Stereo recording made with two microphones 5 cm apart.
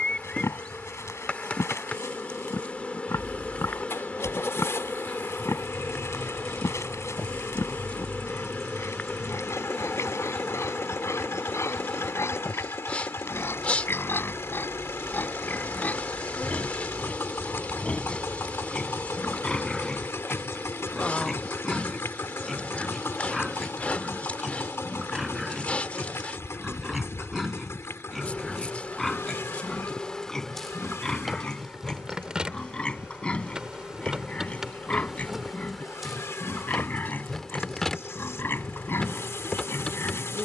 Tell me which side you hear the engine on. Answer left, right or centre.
left.